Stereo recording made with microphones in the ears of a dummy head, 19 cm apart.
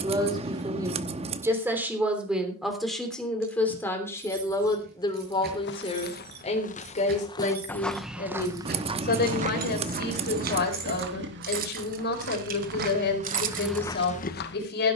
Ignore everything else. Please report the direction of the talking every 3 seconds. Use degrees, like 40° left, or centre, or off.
10° right, 20° left, 40° left, 50° left, 50° left.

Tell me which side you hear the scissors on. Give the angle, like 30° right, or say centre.
30° right.